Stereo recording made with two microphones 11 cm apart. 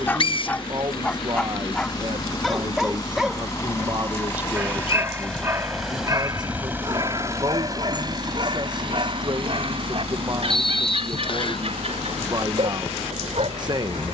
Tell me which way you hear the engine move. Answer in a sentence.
In this clip you hear the engine go from the left side to the right.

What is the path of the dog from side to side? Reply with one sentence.
You can hear the dog move to the right.